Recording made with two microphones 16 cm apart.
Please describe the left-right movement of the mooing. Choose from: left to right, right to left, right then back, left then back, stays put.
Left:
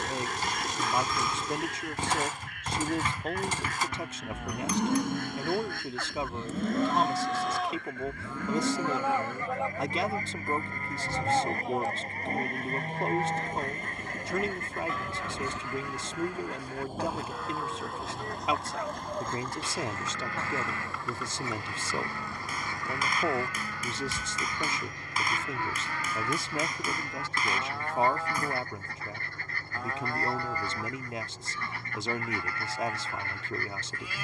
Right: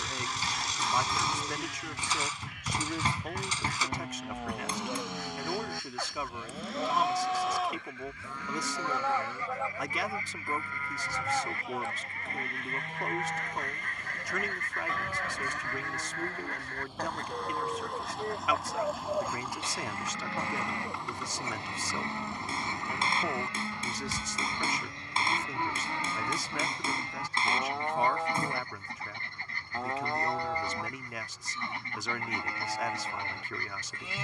left then back.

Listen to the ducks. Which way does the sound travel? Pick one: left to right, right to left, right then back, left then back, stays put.
left to right.